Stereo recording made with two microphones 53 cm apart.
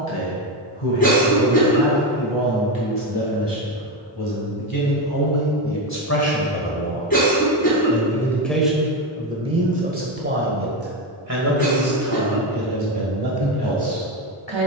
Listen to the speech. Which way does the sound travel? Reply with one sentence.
You can hear the speech move to the right.